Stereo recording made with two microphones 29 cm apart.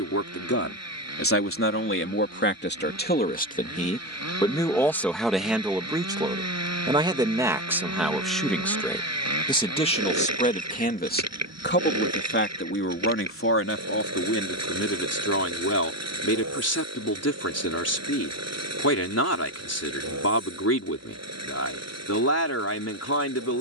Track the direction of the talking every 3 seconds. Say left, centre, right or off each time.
left, centre, centre, left, left, left, left, left.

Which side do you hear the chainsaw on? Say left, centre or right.
right.